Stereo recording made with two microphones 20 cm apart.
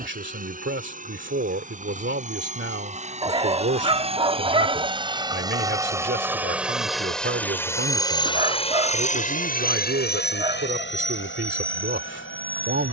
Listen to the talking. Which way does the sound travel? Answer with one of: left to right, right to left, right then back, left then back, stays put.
stays put.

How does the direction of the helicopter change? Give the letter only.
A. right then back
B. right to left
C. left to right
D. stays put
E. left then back
B.